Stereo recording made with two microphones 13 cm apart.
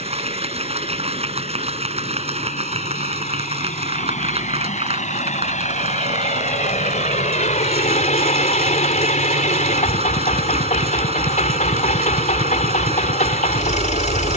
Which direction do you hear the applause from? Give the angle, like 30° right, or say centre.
50° right.